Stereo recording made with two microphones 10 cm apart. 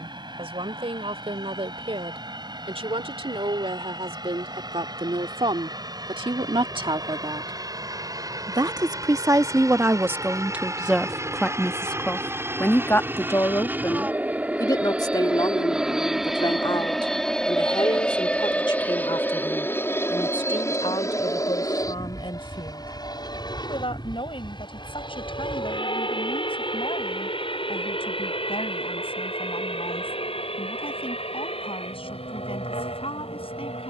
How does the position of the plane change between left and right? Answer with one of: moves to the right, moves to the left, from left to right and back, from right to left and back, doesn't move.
moves to the left.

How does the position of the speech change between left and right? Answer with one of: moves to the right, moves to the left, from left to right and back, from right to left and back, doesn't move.
moves to the left.